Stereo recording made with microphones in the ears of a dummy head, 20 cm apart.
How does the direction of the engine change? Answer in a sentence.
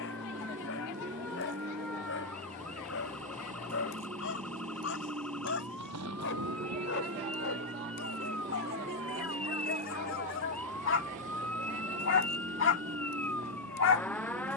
In this clip you hear the engine stay put.